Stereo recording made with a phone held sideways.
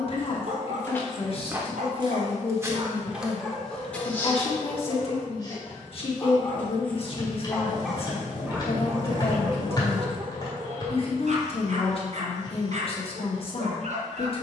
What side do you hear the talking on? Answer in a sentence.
In this clip you hear the talking on the left.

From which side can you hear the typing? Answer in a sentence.
You can hear the typing on the left.